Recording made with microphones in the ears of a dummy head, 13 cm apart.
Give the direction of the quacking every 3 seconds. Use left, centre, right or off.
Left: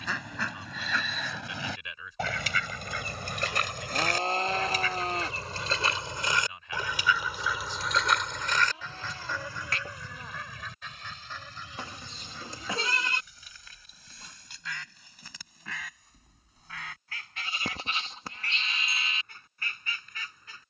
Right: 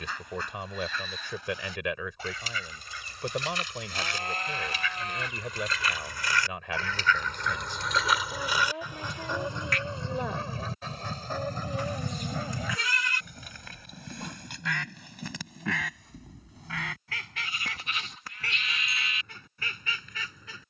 left, left, centre, right, right, right, right.